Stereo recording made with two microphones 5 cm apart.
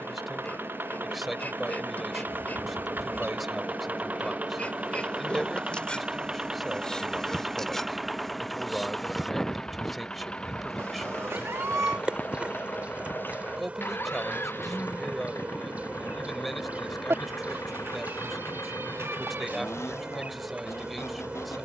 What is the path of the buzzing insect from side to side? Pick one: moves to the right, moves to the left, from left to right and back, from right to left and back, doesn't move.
moves to the right.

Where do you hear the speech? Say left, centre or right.
centre.